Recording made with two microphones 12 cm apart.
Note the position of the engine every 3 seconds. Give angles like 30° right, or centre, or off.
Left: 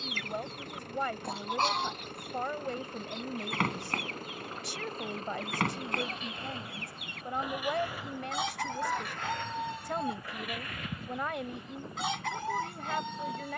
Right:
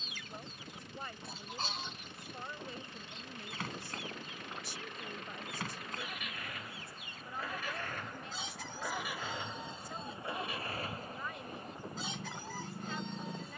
50° left, 40° left, 10° left, 30° right, 50° right.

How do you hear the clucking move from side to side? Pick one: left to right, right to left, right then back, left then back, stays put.
stays put.